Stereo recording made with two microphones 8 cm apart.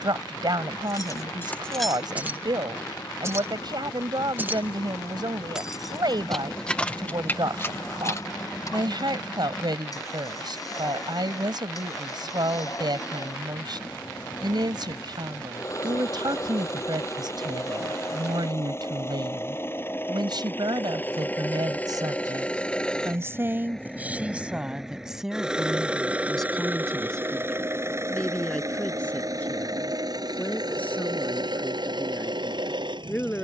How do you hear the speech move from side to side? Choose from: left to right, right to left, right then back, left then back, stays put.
right to left.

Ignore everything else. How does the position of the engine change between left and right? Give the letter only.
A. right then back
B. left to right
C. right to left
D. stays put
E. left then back
B.